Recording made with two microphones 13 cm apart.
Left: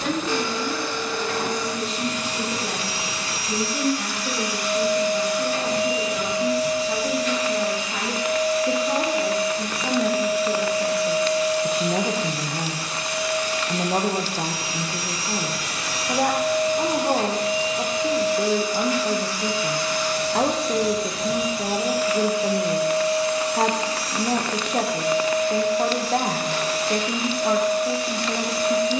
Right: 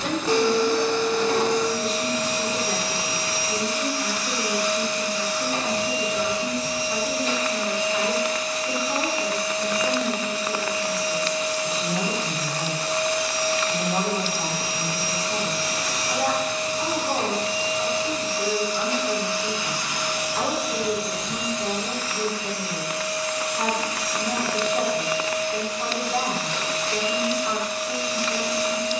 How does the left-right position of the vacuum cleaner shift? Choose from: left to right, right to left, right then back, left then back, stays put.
right to left.